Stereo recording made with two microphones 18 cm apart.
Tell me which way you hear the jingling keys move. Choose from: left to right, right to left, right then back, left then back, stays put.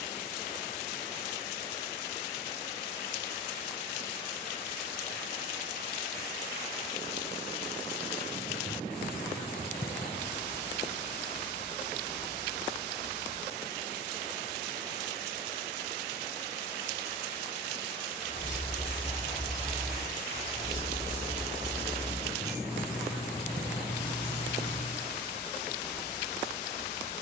right then back.